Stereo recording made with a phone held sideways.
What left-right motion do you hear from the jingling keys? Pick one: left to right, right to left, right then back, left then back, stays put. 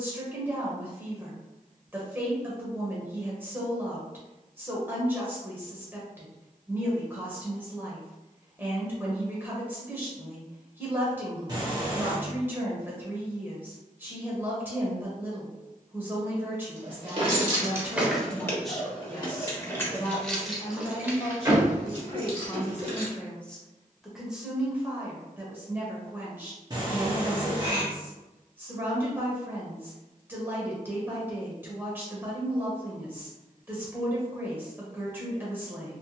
left then back.